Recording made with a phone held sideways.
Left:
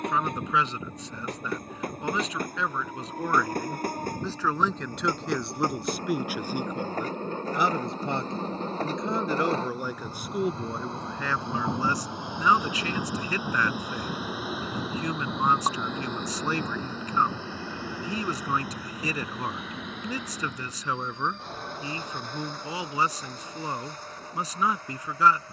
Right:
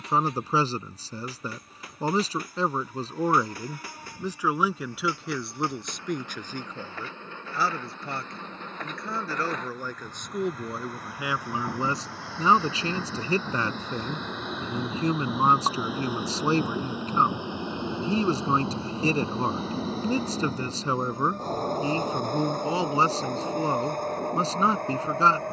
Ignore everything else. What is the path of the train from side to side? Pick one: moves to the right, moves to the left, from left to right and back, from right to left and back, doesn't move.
moves to the right.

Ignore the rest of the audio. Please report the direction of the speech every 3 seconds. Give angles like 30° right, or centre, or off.
40° right, 10° right, 20° left, centre, 30° right, 30° right, 30° right, 30° right, 30° right.